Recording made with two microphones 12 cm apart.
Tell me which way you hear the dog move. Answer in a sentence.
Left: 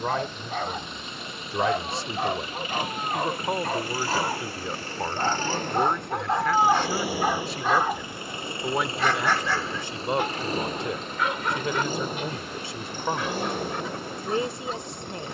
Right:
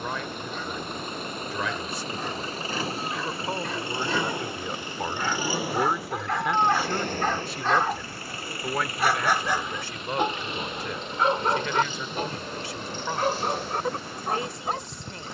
You can hear the dog move to the right.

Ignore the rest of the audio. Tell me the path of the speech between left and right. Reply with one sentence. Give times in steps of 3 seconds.
In this clip you hear the speech on the left from 0 s, in the centre from 3 s and on the left from 9 s.